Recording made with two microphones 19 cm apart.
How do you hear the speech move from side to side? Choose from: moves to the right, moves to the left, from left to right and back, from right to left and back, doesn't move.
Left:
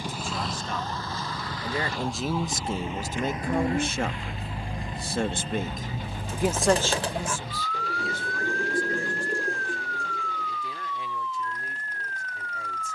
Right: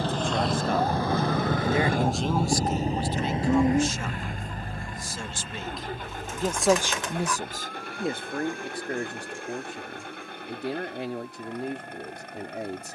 from right to left and back.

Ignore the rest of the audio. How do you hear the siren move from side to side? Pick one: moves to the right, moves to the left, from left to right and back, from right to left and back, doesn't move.
moves to the left.